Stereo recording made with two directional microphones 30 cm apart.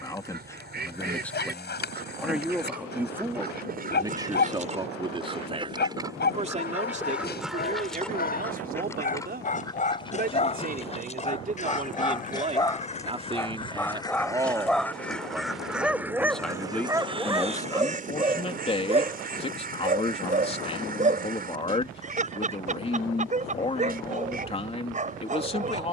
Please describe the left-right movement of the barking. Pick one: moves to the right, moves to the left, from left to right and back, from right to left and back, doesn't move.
moves to the right.